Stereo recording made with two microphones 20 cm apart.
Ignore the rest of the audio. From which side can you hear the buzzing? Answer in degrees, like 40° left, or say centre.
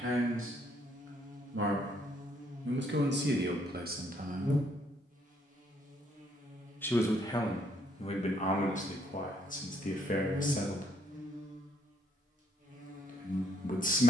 40° right.